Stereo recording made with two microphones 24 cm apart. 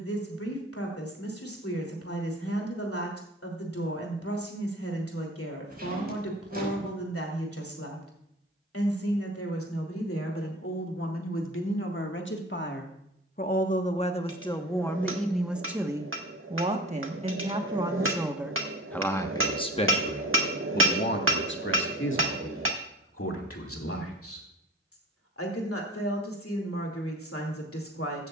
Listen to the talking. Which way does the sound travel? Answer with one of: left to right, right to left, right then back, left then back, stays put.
right then back.